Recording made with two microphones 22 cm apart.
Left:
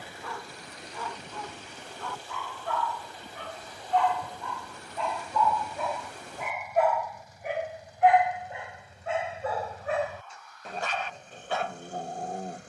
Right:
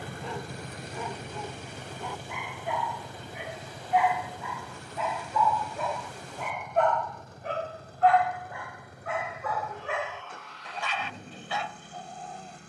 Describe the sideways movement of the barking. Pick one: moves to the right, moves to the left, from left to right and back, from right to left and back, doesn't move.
moves to the left.